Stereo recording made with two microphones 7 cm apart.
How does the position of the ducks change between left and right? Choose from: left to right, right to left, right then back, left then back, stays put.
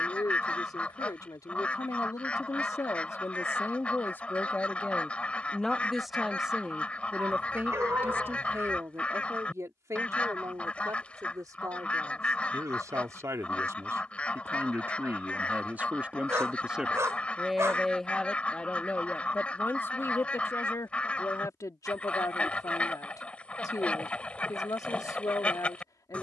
stays put.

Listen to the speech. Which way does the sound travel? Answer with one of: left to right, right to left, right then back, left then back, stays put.
right then back.